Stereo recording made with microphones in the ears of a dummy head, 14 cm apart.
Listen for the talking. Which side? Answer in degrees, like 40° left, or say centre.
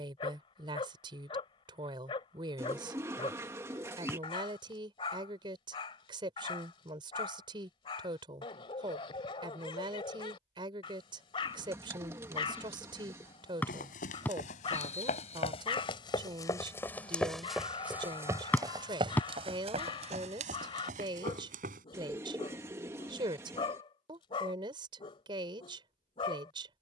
30° right.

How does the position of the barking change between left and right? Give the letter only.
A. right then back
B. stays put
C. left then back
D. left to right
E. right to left
B.